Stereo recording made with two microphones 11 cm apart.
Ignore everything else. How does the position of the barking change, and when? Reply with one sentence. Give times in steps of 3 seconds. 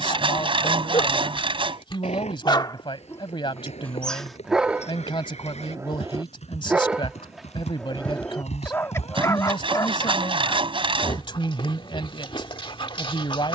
In this clip you hear the barking on the left from 0 s, in the centre from 3 s and on the left from 9 s.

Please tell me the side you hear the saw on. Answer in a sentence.
In this clip you hear the saw on the right.